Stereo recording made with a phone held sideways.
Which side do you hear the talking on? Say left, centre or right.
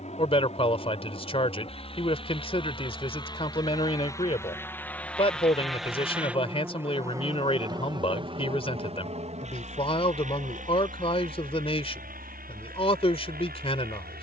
left.